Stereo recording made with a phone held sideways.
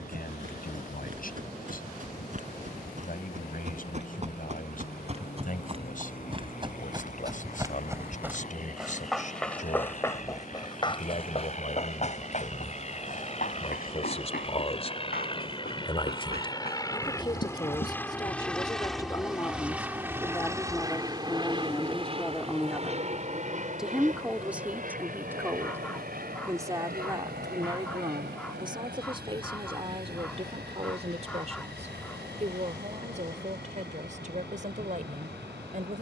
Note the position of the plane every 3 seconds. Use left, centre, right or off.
left, left, left, left, left, left, centre, right, right, right, right, right.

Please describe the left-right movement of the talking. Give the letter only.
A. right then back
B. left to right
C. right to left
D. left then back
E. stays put
B.